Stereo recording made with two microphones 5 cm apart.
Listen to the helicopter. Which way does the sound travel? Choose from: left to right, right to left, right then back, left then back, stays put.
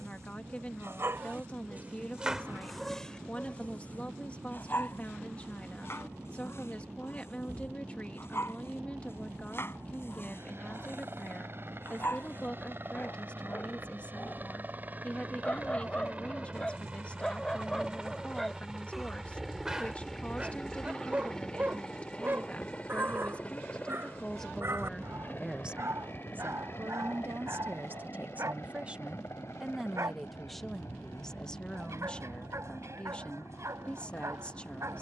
right to left.